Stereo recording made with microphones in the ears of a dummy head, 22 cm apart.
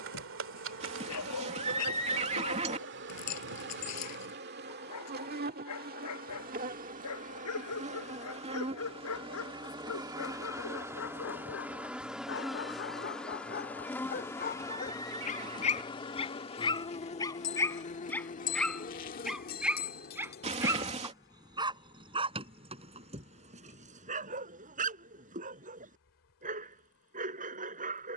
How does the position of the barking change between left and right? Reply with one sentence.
You can hear the barking travel towards the right.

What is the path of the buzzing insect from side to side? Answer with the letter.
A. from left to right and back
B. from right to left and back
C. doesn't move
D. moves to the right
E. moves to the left
E.